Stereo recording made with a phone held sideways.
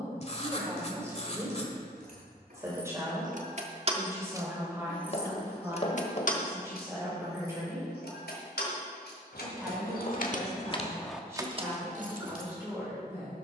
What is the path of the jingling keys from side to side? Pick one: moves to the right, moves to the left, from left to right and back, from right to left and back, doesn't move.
from right to left and back.